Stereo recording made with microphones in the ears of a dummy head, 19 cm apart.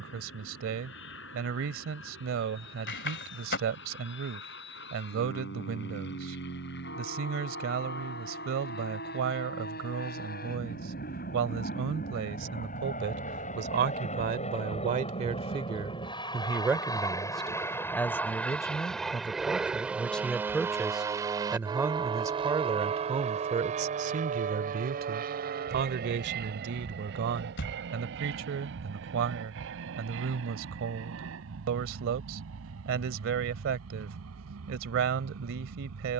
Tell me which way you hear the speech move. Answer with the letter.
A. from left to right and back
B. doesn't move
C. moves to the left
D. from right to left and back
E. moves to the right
D.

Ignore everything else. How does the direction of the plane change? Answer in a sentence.
In this clip you hear the plane go from the left side to the right.